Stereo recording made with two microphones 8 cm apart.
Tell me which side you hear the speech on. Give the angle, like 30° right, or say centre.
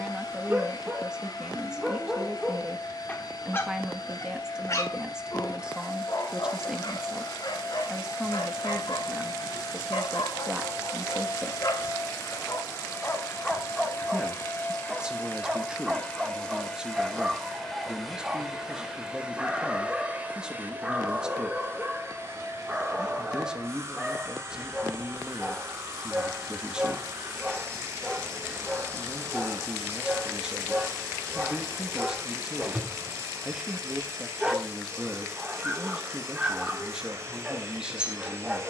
10° right.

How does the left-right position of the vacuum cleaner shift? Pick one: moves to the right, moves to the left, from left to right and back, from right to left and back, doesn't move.
moves to the right.